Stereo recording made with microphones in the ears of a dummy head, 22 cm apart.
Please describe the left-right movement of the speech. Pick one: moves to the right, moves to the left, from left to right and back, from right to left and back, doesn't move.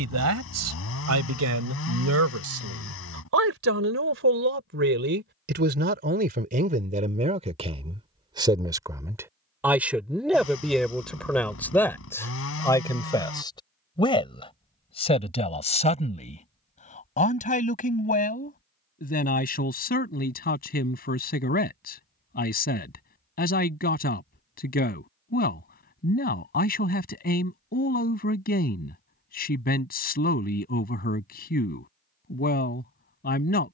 moves to the left.